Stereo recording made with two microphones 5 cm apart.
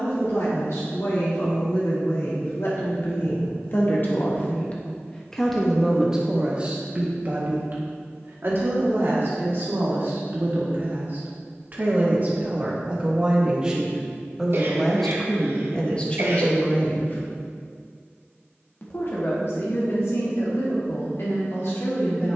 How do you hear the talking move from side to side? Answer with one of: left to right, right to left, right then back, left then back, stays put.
right then back.